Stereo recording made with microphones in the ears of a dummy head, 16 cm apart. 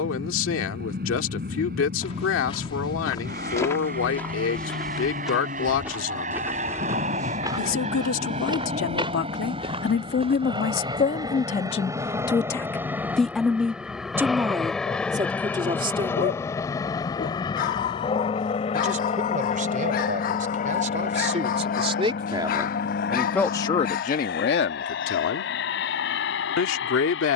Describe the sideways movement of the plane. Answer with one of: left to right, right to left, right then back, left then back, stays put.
right to left.